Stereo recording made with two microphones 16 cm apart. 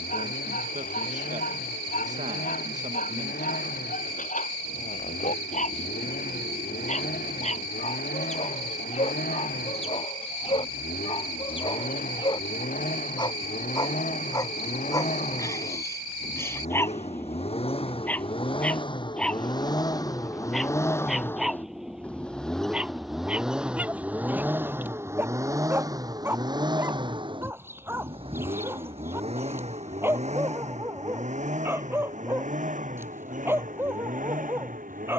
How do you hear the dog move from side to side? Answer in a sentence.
In this clip you hear the dog go from the left side to the right.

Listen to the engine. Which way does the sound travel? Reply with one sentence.
In this clip you hear the engine go from the left side to the right.